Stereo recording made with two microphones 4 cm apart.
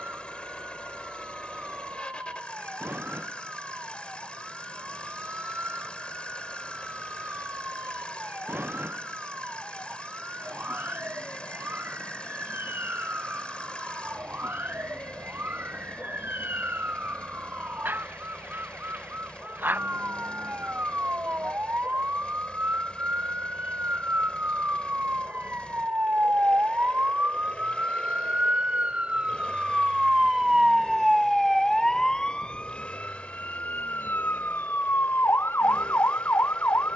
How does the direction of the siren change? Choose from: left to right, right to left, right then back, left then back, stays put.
right to left.